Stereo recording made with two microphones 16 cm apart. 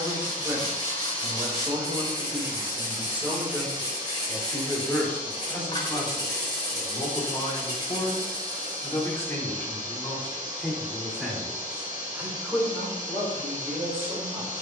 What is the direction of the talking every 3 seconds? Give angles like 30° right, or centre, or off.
20° right, centre, 30° left, centre, 10° right.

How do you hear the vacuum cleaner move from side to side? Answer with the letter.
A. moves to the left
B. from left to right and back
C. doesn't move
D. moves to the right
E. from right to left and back
C.